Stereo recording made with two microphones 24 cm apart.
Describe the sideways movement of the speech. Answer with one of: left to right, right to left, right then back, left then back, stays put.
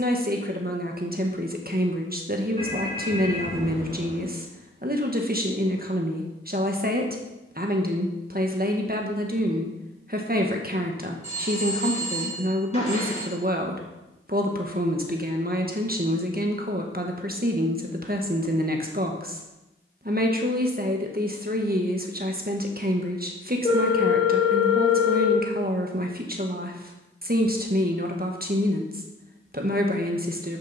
stays put.